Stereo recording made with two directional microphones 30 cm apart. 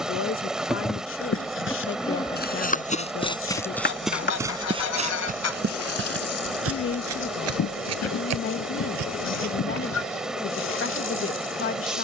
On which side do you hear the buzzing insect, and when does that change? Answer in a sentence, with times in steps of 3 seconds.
In this clip you hear the buzzing insect in the centre from 0 s and on the left from 3 s.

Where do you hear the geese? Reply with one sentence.
You can hear the geese on the left.